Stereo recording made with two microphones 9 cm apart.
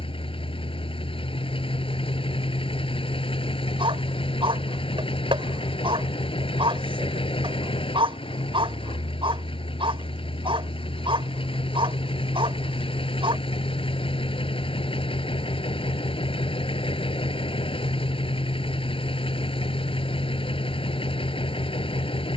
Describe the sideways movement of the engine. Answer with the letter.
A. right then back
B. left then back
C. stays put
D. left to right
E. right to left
C.